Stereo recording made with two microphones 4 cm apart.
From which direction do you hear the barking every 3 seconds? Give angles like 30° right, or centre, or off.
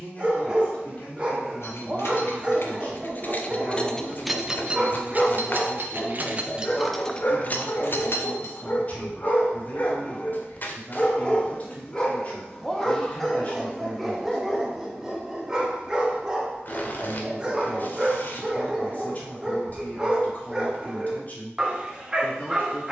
20° right, 10° right, 40° left, 30° left, centre, 10° right, 20° right, 20° right.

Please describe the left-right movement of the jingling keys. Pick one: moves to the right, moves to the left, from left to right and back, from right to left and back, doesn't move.
from left to right and back.